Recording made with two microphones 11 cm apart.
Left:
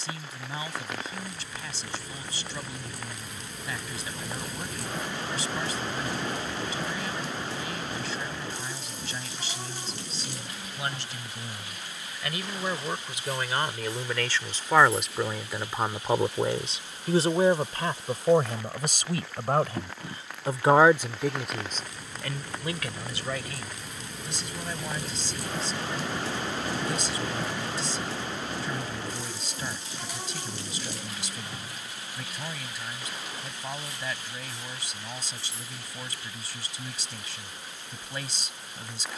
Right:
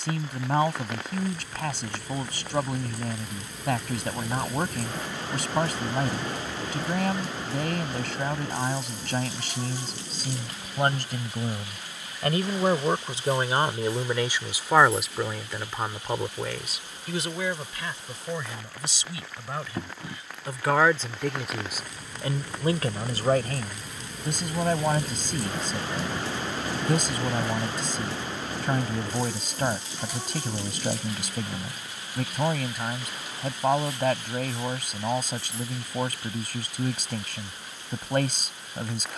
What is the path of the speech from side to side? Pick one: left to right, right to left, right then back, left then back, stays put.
left then back.